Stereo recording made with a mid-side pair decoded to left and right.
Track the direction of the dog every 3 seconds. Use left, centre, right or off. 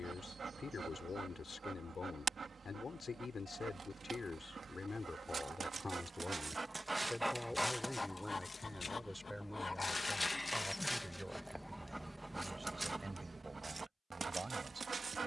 right, right, centre, centre, right.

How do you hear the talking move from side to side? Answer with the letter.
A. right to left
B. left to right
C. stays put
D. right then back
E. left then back
B.